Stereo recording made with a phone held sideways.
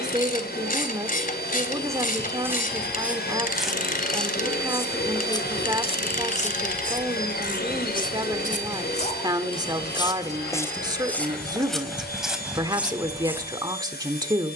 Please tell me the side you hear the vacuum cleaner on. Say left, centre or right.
left.